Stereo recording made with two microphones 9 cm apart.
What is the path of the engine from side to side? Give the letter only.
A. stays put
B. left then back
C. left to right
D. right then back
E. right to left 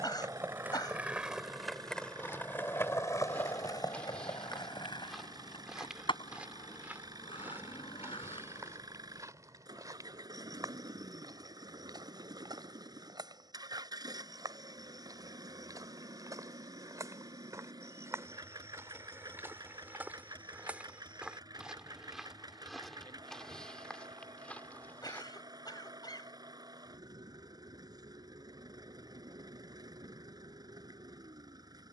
A.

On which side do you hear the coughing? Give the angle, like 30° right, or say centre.
50° left.